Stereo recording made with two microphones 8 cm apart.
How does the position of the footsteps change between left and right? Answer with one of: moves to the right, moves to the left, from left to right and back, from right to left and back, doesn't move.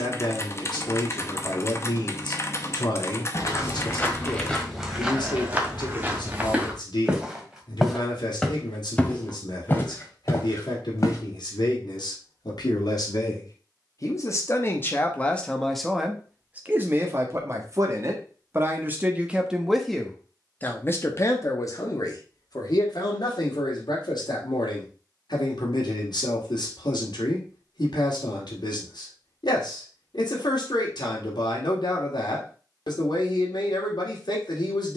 from left to right and back.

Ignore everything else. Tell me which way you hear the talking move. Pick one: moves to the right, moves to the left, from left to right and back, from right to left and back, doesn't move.
from left to right and back.